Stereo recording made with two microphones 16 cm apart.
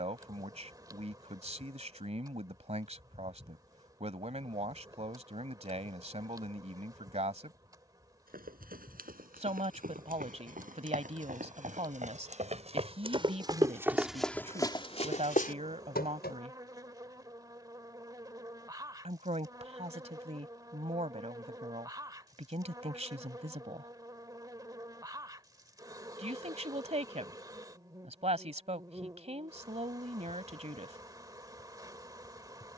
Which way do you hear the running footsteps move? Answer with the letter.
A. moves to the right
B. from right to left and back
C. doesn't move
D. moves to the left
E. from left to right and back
D.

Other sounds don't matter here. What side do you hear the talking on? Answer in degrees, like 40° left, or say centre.
40° right.